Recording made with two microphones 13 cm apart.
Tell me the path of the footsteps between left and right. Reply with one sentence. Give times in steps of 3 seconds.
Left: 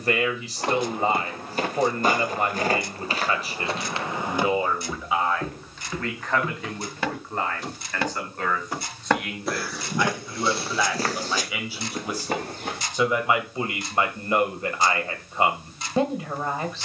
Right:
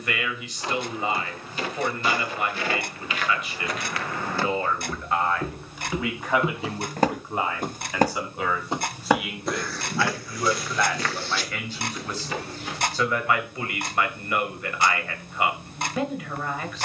In this clip you hear the footsteps on the left from 0 s, in the centre from 3 s, on the right from 6 s, on the left from 9 s and not at all from 15 s.